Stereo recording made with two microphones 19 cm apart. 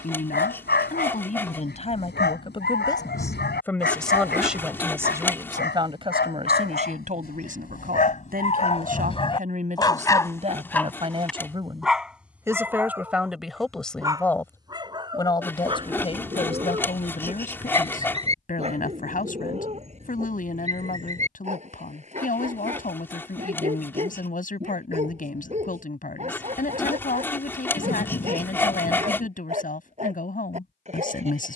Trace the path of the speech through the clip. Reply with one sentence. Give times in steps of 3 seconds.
In this clip you hear the speech on the left from 0 s, in the centre from 3 s, on the right from 6 s, in the centre from 12 s and on the left from 15 s.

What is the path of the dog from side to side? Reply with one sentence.
In this clip you hear the dog move to the right.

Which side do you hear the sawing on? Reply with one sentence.
In this clip you hear the sawing in the centre.